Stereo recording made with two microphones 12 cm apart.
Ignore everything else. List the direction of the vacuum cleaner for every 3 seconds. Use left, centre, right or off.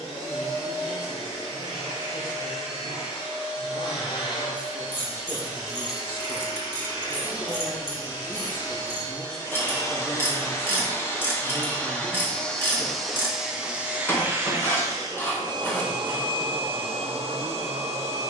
left, left, left, left, centre, right.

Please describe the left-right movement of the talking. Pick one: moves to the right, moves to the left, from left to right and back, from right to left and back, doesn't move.
moves to the right.